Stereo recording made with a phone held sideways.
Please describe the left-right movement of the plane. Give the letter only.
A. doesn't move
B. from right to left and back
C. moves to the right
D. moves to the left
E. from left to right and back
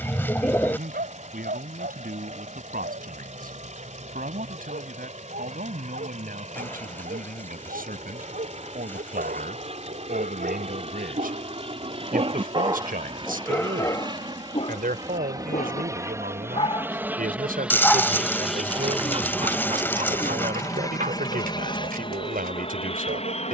D.